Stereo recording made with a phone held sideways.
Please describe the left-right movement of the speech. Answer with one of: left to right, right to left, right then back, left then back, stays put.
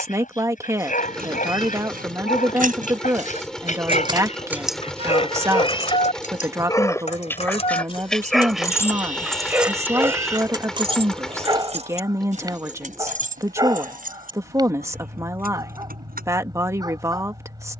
stays put.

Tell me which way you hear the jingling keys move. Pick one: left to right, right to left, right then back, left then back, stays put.
left then back.